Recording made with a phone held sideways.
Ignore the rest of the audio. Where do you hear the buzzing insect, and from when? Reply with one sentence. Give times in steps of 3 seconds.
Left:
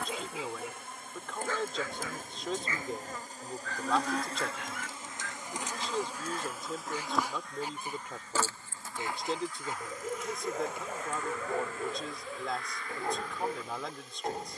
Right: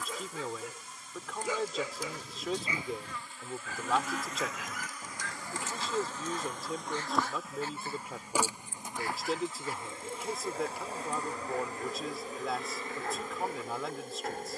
In this clip you hear the buzzing insect on the left from 0 s, in the centre from 6 s and on the right from 9 s.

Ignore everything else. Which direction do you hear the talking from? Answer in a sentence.
In this clip you hear the talking in the centre.